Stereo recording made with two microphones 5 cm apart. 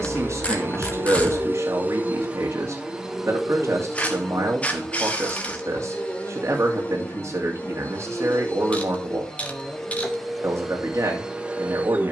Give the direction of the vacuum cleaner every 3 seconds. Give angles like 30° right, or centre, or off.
30° right, 10° left, 20° left, centre.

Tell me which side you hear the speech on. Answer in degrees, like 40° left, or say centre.
70° right.